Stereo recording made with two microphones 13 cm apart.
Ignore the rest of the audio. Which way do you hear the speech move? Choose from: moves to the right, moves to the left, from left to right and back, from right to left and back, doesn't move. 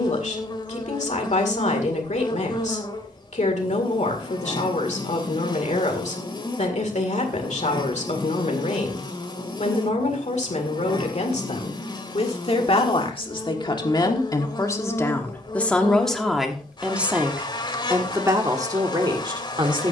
moves to the right.